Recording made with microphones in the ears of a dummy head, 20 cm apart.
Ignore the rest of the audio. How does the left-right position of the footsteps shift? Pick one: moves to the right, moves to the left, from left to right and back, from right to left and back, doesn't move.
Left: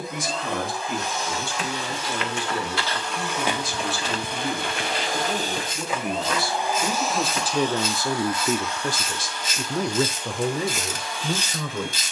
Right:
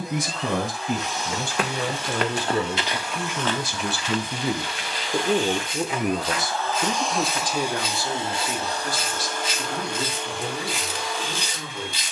moves to the left.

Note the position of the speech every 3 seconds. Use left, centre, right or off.
right, right, centre, left.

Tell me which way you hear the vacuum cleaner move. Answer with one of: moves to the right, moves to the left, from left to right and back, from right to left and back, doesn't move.
moves to the right.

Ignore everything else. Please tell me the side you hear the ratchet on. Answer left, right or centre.
left.